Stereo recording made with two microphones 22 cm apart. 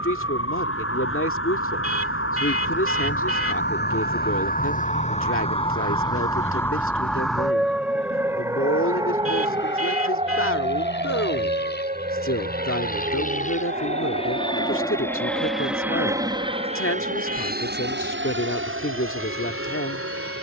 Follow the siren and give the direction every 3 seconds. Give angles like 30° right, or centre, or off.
70° left, 40° left, centre, 30° right, 40° right, 50° right, 50° right.